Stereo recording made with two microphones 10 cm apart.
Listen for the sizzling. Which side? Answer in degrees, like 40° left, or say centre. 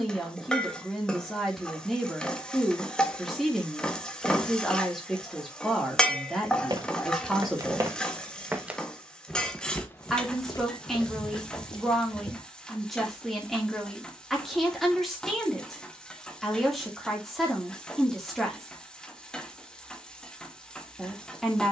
10° left.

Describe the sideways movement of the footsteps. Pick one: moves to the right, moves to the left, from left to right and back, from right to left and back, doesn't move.
moves to the left.